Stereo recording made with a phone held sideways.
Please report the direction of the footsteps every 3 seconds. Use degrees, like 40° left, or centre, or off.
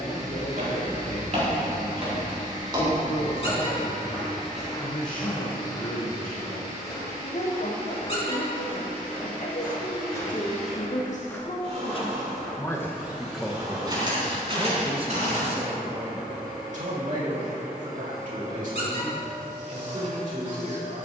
50° right, centre, 30° left, 20° left, 20° right, 50° right, off.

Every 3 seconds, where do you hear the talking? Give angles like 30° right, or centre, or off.
80° left, 80° left, 80° left, 60° left, centre, 50° right, 60° right.